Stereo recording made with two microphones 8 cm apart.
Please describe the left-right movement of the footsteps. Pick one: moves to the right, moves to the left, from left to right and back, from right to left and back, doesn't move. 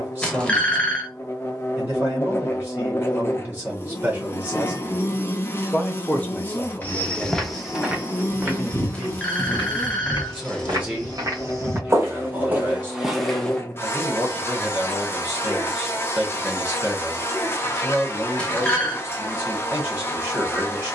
from left to right and back.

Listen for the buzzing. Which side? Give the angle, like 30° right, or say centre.
30° left.